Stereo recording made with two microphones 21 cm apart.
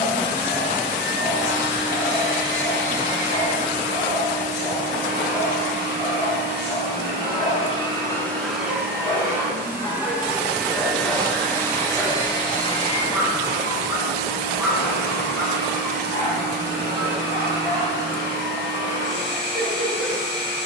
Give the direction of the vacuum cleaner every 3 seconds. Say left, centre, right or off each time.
left, left, left, centre, left, left, left.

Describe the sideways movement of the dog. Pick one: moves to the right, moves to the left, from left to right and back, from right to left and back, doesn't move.
from left to right and back.